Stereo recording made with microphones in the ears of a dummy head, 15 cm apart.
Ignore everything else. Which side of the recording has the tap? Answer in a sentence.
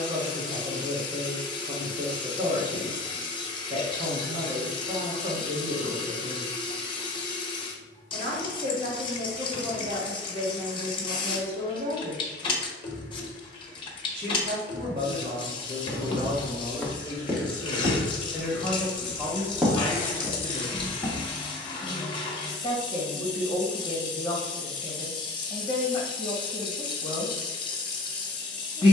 You can hear the tap on the left.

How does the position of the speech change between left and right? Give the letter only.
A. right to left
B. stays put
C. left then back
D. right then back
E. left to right
A.